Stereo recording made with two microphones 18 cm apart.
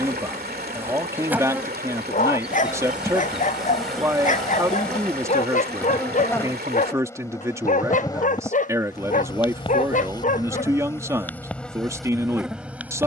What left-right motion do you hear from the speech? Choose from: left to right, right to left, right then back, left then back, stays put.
stays put.